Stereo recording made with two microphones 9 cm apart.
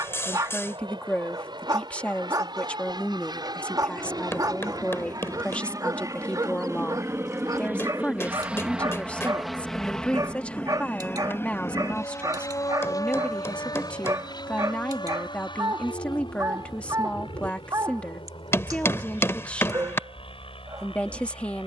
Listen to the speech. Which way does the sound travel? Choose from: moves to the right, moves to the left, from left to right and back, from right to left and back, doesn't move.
doesn't move.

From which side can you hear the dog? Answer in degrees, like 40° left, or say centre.
40° right.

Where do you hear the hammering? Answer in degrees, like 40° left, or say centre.
30° left.